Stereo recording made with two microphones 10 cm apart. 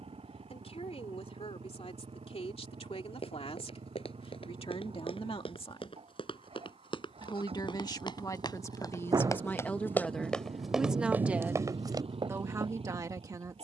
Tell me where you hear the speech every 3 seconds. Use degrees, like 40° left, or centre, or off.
80° left, 70° left, 40° left, centre, 30° right.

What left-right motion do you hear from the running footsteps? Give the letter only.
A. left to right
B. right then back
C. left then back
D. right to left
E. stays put
A.